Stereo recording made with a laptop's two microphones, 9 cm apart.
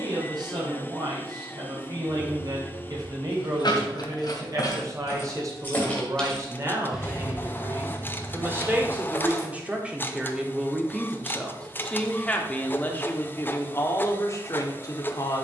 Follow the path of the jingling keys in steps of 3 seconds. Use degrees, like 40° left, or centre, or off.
60° left, 40° left, 20° right, off, off.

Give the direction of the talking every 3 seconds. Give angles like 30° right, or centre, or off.
50° right, 40° right, 30° right, 10° right, 30° left.